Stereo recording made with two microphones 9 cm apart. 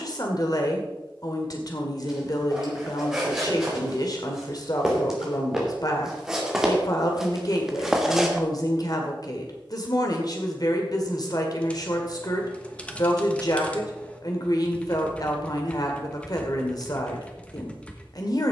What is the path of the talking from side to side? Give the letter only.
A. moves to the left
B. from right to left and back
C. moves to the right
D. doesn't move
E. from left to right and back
D.